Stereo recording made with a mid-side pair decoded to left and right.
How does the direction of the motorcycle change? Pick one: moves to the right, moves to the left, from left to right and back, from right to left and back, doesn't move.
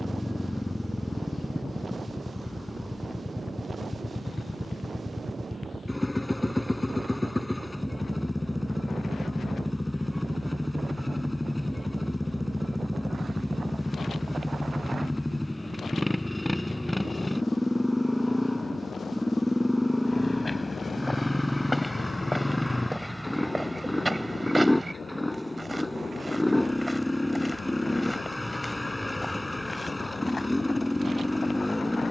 doesn't move.